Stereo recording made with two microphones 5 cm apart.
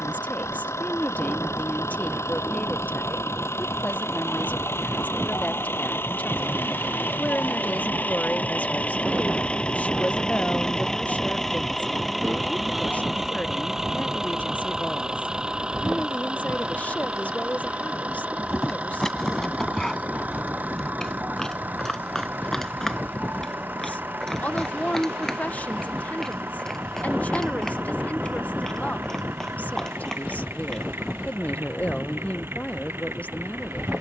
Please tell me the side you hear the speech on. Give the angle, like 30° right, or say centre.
30° left.